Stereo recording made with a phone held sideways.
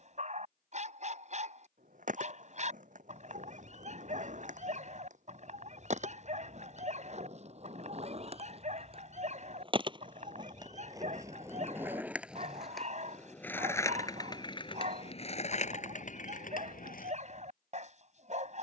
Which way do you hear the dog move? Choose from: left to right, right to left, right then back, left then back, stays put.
stays put.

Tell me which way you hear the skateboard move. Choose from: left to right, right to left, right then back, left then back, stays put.
right to left.